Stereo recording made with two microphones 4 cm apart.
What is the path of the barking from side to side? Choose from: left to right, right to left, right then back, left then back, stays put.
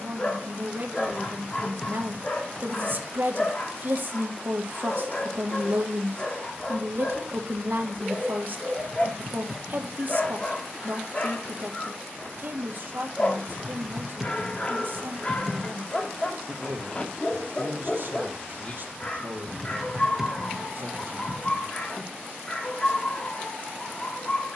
stays put.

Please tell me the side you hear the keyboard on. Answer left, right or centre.
centre.